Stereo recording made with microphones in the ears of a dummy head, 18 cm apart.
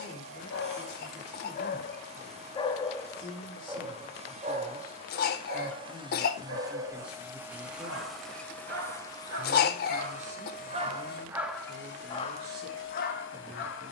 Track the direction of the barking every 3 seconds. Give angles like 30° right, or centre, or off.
40° left, 30° right, 70° right, 30° right, 50° left.